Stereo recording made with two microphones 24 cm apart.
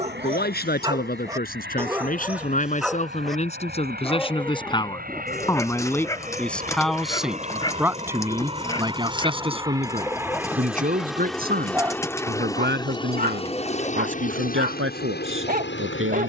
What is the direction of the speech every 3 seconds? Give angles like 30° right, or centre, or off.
40° left, 20° left, 10° right, 30° right, 50° right, 60° right.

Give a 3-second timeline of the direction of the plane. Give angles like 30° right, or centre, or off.
50° right, 40° right, 30° right, 10° right, 20° left, 50° left.